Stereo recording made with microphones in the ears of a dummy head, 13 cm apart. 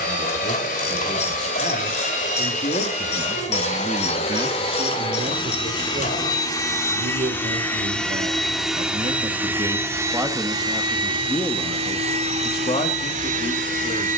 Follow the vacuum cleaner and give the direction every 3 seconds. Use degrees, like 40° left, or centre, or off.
50° left, 40° left, 10° left, 20° right, 50° right.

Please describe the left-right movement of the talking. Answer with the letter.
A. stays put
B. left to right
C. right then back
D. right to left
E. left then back
C.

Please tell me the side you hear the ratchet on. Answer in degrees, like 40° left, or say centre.
50° left.